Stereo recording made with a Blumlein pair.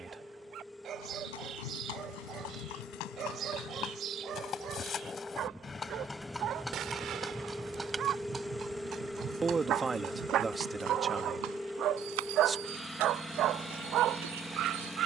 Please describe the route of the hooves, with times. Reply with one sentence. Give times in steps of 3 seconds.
In this clip you hear the hooves on the left from 0 s, in the centre from 6 s and on the right from 9 s.